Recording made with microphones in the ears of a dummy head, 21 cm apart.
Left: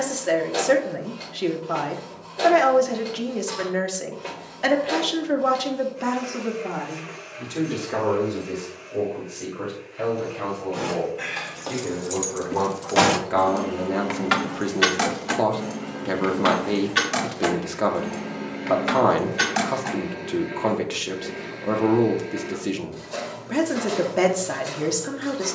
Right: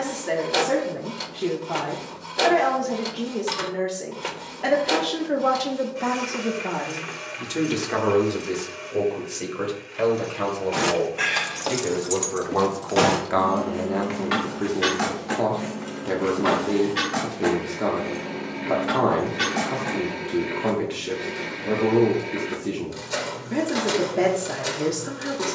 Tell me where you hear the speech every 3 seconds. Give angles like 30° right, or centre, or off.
40° left, 30° left, 20° right, 50° right, centre, 40° left, 40° left, 40° left, 40° left.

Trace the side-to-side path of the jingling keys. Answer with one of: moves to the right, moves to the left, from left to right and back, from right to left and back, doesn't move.
moves to the left.